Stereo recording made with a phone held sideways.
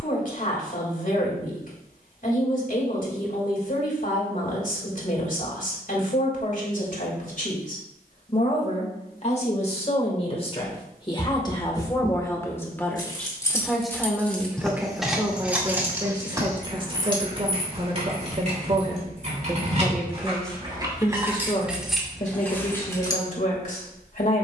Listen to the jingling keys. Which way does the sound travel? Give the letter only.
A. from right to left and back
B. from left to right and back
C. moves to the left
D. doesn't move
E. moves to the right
B.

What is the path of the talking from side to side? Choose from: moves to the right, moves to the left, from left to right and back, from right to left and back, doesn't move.
from left to right and back.